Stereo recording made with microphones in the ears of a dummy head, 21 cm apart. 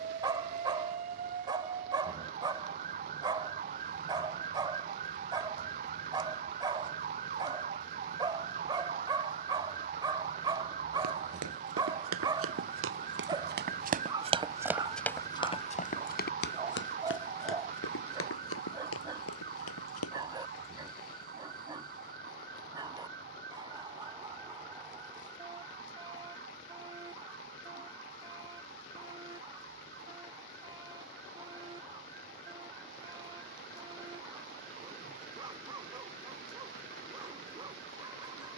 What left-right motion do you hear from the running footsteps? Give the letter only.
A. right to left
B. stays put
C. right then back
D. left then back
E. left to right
A.